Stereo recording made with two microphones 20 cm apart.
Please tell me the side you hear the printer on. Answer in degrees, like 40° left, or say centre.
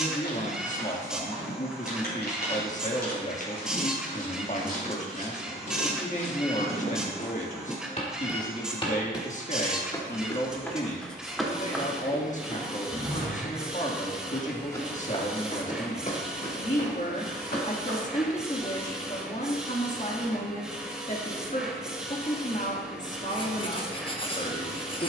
centre.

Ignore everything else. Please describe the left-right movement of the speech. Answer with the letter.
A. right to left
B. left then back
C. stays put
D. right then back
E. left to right
C.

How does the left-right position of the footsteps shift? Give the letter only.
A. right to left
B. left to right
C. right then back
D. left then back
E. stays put
C.